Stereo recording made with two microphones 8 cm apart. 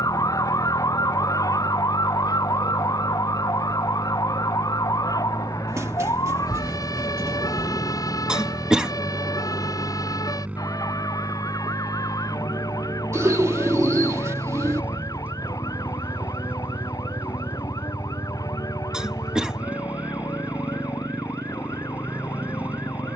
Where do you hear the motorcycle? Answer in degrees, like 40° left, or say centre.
20° right.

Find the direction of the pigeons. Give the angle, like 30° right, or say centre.
40° right.